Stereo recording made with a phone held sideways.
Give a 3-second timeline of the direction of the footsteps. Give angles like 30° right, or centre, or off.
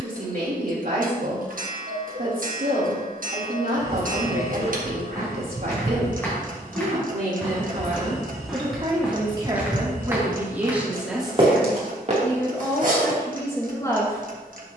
off, 20° left, 10° left, 20° right, 50° right.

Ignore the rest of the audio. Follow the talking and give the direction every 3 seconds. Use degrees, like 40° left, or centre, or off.
60° right, 60° right, 50° right, 10° right, 20° left.